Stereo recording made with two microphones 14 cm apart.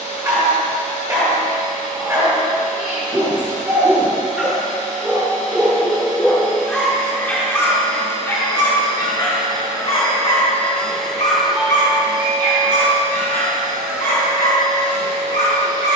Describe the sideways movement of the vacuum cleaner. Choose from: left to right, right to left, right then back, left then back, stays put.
left to right.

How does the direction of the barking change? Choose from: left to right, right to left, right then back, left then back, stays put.
right to left.